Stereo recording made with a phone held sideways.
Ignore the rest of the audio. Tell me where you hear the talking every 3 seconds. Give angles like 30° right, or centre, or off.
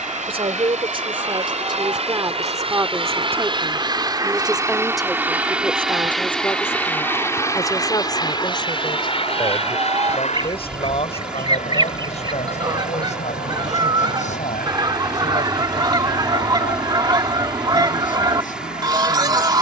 30° right, 10° right, 20° left, 40° left, 50° left, 60° left, 60° left.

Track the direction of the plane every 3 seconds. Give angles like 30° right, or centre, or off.
50° right, 20° right, 20° left, 40° left, 60° left, 60° left, 70° left.